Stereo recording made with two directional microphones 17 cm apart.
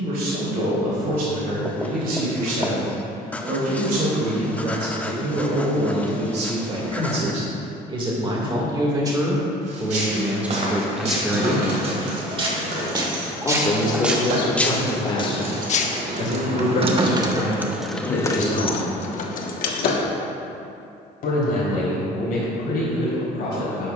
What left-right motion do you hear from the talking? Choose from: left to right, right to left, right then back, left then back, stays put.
right to left.